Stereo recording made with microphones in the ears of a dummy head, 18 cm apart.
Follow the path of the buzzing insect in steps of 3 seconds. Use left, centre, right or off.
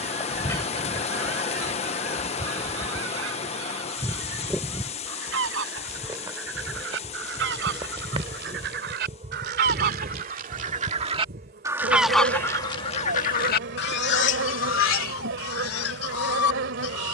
centre, centre, right, right, right, right.